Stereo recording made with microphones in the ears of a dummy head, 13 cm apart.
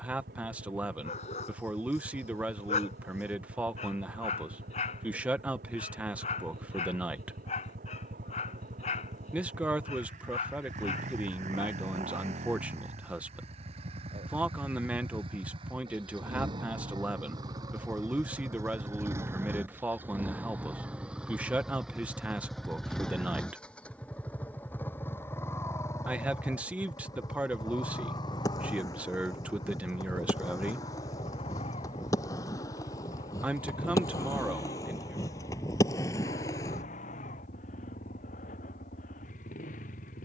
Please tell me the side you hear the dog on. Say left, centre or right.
left.